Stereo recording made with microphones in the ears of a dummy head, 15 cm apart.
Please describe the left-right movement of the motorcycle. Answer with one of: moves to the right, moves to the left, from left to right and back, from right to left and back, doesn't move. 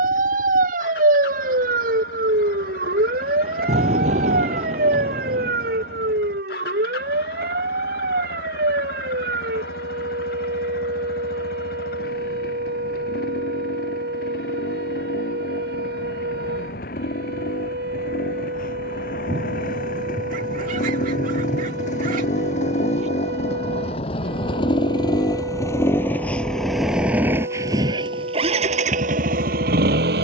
moves to the right.